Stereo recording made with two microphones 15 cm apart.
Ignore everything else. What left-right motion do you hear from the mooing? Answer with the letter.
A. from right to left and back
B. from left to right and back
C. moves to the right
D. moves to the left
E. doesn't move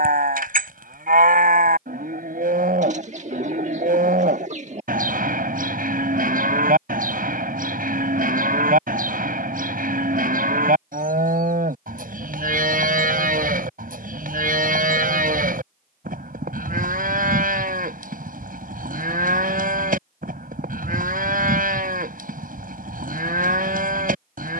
E.